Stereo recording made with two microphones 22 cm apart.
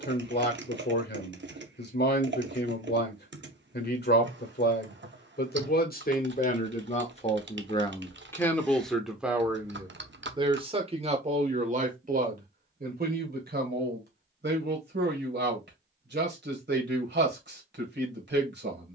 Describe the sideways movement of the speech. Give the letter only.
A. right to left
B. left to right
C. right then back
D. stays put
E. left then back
B.